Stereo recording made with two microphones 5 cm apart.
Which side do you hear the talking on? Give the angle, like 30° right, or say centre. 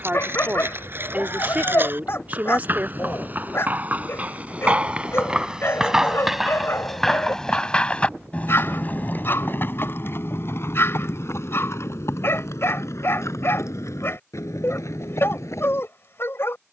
40° right.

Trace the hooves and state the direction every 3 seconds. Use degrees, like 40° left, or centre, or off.
50° right, 30° right, 10° left, 50° left, 70° left, 80° left.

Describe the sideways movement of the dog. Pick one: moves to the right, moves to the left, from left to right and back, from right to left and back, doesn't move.
doesn't move.